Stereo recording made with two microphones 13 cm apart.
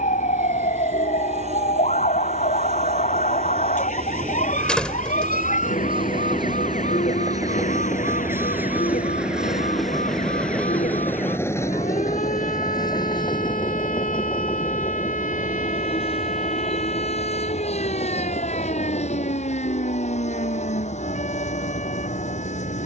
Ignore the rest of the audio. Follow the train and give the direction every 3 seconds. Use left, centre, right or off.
right, right, right, centre, left, left, left, left.